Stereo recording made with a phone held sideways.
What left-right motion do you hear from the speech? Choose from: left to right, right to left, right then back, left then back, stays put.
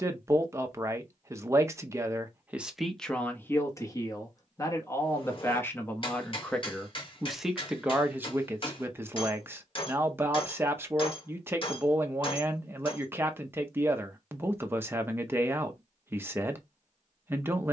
left then back.